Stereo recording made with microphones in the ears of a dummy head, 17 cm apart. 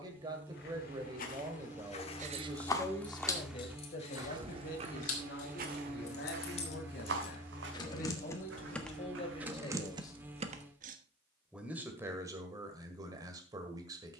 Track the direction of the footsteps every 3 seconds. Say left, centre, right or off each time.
left, right, right, right, off.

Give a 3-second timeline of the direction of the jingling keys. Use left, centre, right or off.
right, left, left, right, off.